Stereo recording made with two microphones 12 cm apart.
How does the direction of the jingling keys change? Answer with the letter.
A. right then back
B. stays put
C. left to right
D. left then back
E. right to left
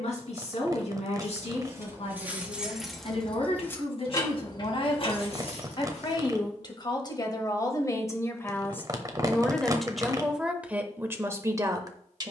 E.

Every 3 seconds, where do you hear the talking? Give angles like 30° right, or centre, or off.
60° left, 50° left, 30° left, 10° right.